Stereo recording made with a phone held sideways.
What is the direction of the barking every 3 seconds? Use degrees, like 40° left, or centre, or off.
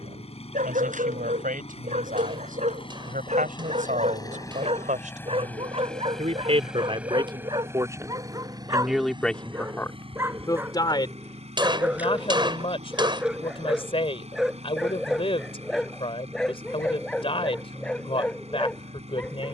60° right, 40° right, 30° right, 20° right, centre, centre, 10° left.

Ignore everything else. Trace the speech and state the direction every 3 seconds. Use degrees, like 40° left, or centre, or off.
70° right, 70° right, 30° right, 20° left, 40° left, 40° left, 40° left.